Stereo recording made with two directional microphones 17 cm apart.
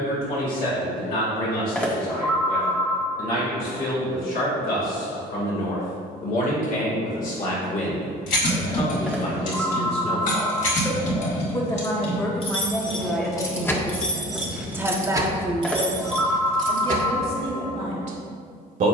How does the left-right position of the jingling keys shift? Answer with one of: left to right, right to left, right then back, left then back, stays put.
left to right.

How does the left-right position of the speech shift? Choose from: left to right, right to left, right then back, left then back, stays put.
left to right.